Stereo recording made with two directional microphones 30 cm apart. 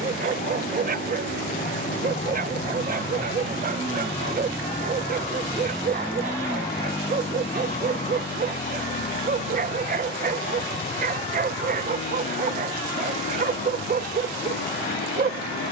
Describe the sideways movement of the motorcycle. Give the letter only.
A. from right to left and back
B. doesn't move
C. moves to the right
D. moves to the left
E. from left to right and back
D.